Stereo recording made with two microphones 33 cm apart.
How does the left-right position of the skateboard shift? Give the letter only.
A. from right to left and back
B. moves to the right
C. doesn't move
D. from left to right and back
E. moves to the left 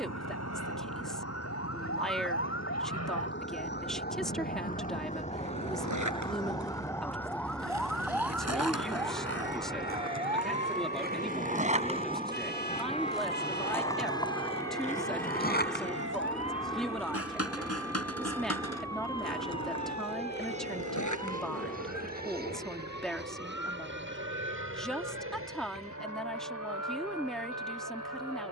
E.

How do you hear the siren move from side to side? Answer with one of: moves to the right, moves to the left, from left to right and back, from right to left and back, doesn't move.
moves to the right.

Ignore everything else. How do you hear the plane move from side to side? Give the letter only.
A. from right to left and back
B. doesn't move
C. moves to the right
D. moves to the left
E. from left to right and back
C.